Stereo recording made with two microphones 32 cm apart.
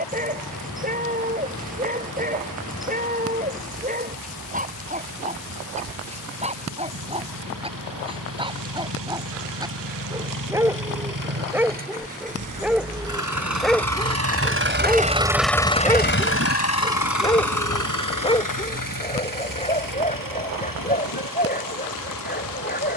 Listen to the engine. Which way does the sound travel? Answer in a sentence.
You can hear the engine move from right to left.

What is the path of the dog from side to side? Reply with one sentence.
In this clip you hear the dog go from the right side to the left.